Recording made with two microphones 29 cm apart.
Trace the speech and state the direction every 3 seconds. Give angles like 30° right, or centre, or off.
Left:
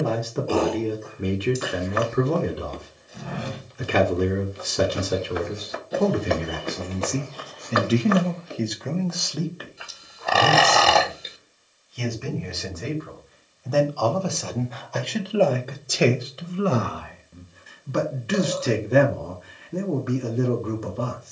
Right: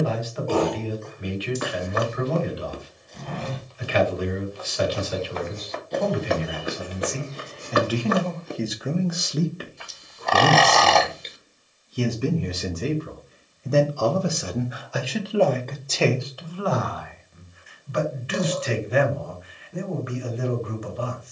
50° left, 50° left, 30° left, 40° right, 30° right, 20° left, 50° left.